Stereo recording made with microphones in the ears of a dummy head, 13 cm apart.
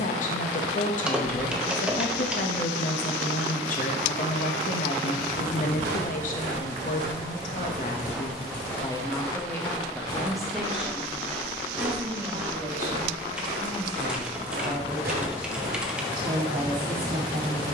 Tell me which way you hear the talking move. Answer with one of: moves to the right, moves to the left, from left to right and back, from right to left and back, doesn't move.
moves to the right.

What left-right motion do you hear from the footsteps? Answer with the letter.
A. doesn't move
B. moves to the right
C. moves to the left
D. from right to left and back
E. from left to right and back
D.